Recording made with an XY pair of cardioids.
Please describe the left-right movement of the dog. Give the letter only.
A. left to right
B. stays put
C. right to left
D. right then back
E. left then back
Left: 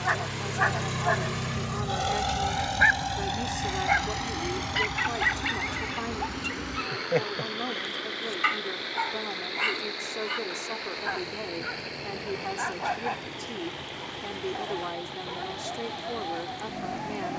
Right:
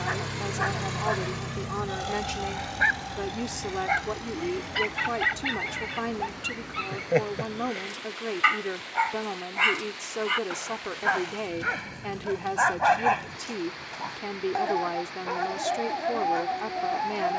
A.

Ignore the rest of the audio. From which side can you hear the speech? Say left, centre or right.
right.